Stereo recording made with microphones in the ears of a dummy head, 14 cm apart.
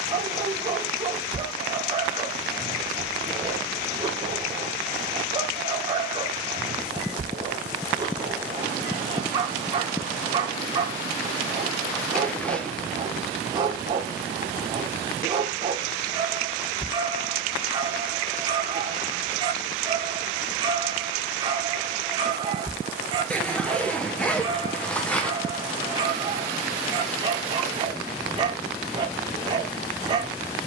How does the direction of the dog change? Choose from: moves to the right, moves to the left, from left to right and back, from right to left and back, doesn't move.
doesn't move.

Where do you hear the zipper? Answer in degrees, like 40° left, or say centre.
10° left.